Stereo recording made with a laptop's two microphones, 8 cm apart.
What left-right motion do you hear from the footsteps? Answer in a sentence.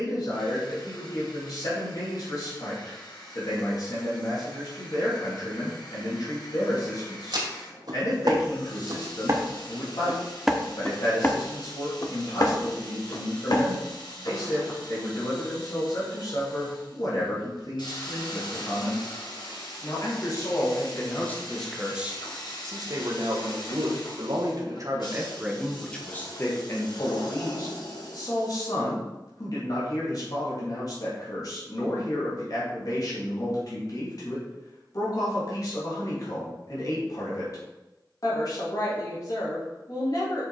In this clip you hear the footsteps move to the left.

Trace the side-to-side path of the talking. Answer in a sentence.
You can hear the talking go right and come back.